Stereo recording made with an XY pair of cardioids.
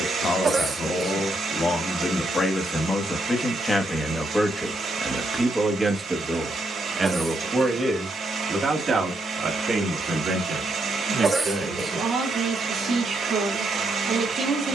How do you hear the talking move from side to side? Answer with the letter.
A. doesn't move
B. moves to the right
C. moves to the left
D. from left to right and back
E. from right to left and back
B.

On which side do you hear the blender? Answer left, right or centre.
right.